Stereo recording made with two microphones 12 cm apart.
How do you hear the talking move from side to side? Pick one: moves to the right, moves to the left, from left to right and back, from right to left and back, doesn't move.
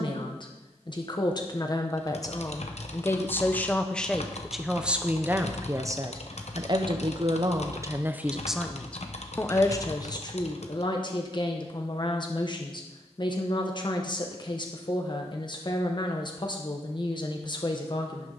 from left to right and back.